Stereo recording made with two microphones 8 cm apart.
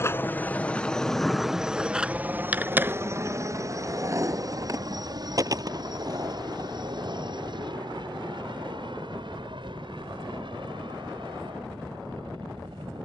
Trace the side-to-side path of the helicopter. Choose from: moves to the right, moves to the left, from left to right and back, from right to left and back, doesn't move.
moves to the right.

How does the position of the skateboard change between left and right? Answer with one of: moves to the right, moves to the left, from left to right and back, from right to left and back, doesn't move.
moves to the right.